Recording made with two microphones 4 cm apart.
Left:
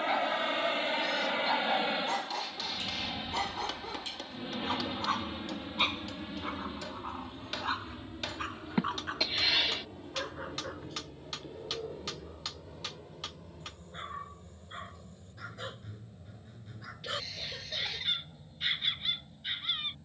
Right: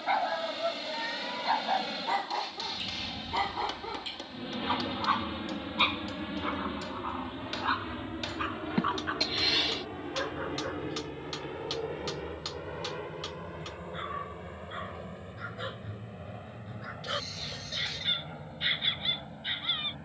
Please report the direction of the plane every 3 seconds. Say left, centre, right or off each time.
left, centre, right, right, right, right, right.